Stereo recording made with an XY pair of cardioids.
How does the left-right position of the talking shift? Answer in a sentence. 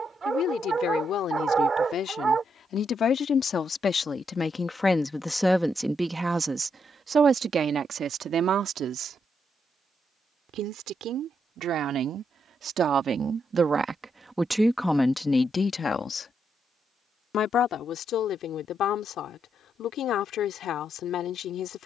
In this clip you hear the talking move from left to right and back again.